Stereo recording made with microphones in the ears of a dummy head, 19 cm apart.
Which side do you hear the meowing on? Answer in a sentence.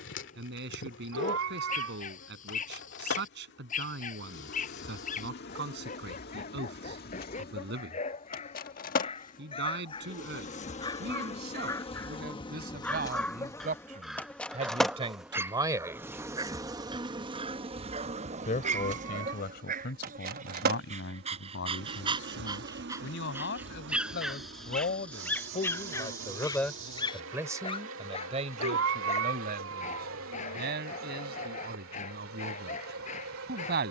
You can hear the meowing on the right.